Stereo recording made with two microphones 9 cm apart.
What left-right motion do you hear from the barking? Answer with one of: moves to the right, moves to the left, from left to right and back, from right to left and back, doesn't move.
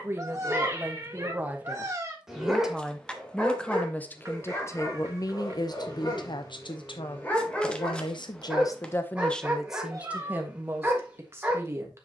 from right to left and back.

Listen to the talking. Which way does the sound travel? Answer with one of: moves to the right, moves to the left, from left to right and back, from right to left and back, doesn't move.
from right to left and back.